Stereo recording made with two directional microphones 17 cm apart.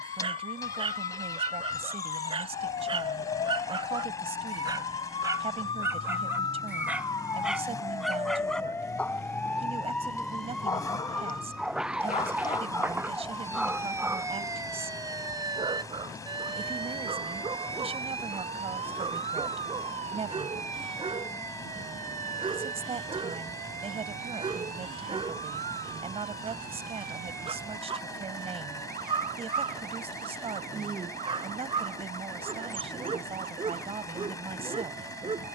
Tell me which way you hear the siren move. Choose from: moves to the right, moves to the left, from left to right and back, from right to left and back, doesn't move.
moves to the right.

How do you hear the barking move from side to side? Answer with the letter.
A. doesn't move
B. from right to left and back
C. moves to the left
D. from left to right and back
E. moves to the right
B.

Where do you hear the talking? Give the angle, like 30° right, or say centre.
40° right.